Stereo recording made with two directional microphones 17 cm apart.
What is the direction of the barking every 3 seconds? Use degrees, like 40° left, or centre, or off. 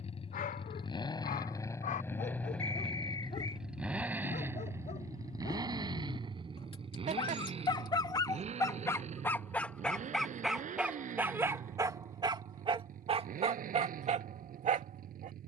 50° left, 40° left, 30° left, centre, 40° right.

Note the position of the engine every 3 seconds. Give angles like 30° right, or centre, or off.
20° left, 10° right, 30° right, 50° right, 50° right.